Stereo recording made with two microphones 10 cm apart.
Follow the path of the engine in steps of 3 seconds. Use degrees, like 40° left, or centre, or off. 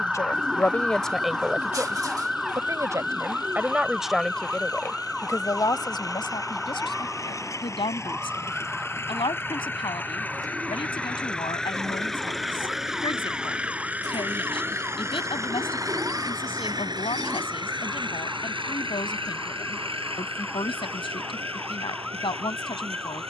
50° left, 40° left, 30° left, 20° left, 10° right, 40° right, 60° right, 80° right.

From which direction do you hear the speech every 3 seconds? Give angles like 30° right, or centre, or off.
centre, 10° left, 60° left, 60° left, 60° left, 60° left, 60° left, 60° left.